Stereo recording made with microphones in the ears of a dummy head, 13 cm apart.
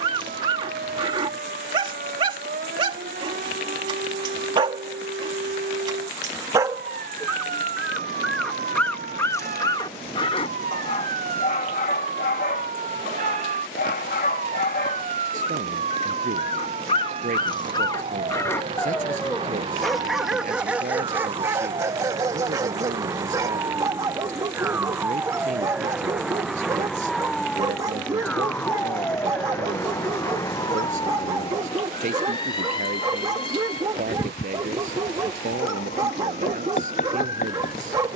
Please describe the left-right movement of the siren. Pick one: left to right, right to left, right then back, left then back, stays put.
right to left.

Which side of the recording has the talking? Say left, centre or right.
right.